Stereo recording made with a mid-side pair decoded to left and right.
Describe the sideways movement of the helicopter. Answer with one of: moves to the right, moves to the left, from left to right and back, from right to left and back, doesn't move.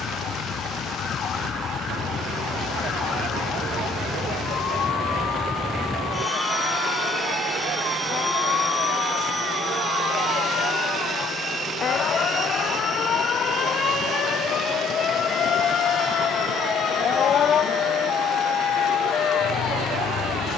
moves to the right.